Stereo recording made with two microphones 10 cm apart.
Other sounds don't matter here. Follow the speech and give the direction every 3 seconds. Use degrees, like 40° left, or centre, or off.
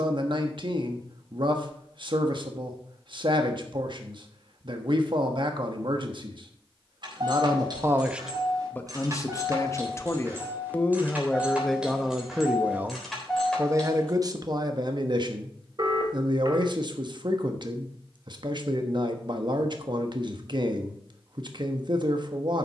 60° right, 60° right, 30° right, 20° left, 30° right, 50° right, 50° right, 50° right.